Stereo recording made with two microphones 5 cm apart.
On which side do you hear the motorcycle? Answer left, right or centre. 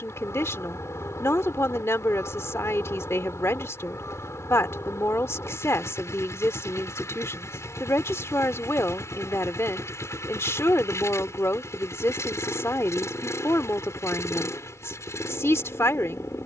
left.